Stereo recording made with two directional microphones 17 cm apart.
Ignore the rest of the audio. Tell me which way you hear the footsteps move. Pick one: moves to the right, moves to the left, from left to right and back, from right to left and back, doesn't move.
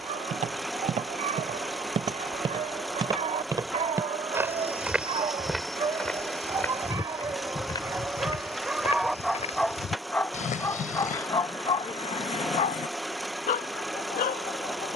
moves to the left.